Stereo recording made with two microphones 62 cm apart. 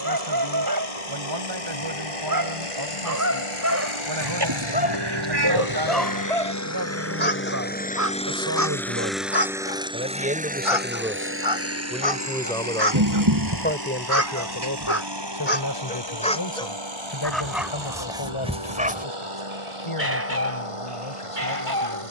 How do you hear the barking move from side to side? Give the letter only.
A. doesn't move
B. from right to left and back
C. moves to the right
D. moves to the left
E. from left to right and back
B.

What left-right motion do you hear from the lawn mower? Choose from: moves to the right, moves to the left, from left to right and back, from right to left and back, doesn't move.
moves to the right.